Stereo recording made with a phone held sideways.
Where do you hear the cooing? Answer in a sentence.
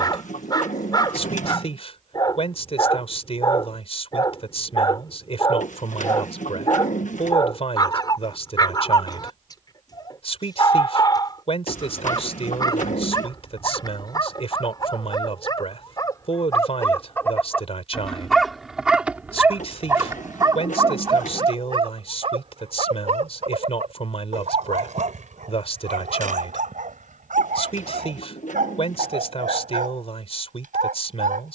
You can hear the cooing on the left.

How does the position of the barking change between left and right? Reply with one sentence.
You can hear the barking move from left to right.